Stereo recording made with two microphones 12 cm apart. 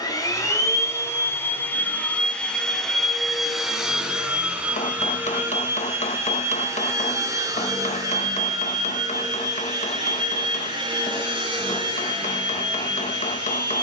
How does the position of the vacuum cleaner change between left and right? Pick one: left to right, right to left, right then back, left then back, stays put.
left to right.